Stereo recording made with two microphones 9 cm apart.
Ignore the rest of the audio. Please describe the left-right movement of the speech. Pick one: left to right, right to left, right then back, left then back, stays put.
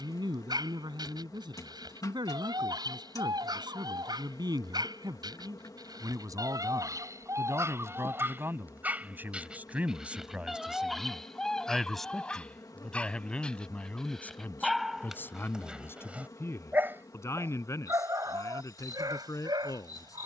right to left.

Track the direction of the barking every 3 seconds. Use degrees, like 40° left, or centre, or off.
60° right, 60° right, 40° right, centre, 10° left, 20° right, 50° right.